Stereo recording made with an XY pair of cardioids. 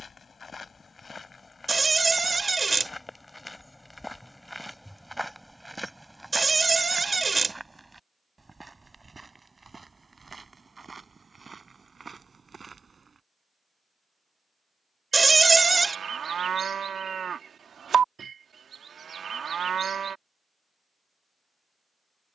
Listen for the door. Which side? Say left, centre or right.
right.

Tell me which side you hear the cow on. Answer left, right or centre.
right.